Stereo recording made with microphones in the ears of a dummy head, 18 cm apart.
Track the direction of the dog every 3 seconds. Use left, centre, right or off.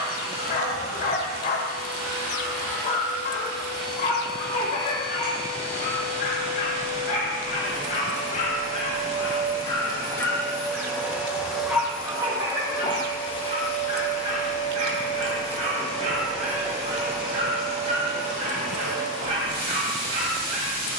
left, left, left, centre, right, right, right.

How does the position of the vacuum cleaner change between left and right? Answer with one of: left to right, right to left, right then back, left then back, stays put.
left then back.